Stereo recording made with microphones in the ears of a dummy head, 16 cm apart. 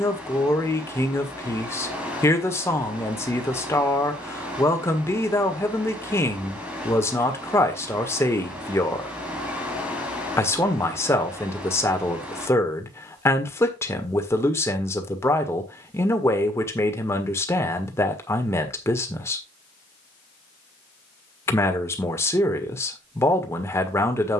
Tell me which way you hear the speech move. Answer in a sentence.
You can hear the speech stay in one place.